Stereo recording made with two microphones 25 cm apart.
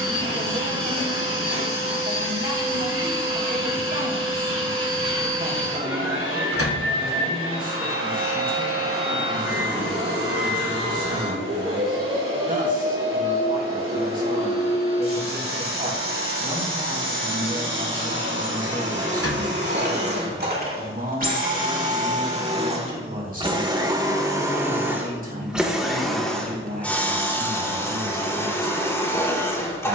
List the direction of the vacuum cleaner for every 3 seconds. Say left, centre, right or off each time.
right, right, right, right, right, right, right, right, centre, centre.